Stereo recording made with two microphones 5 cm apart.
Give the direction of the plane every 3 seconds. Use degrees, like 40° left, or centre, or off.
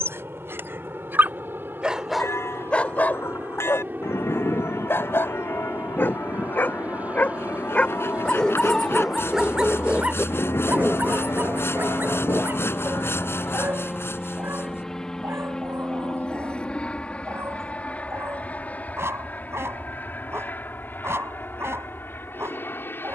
50° right, 40° right, 30° right, 20° right, centre, 20° left, 40° left, 40° left.